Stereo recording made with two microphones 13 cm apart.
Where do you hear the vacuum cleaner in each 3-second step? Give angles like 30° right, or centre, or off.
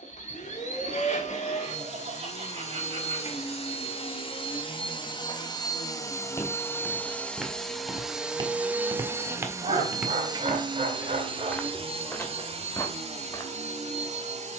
60° left, 40° left, 10° left, 30° right, 50° right.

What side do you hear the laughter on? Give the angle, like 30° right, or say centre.
50° right.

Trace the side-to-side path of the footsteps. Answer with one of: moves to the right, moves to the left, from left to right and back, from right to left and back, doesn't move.
from left to right and back.